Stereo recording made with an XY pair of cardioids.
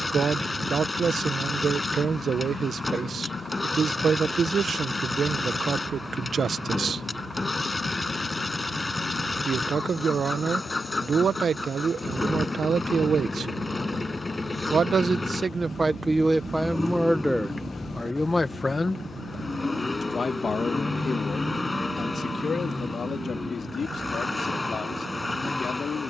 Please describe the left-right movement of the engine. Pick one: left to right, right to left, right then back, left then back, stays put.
stays put.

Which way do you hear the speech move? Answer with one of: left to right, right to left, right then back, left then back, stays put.
right to left.